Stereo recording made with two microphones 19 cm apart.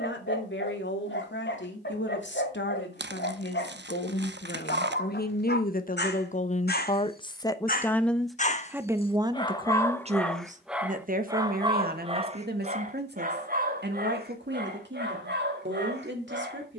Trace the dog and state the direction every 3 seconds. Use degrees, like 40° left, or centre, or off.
70° left, 70° left, 50° left, centre, 50° right, 60° right.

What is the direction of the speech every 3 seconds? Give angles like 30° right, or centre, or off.
70° left, 60° left, 20° left, 40° right, 60° right, 70° right.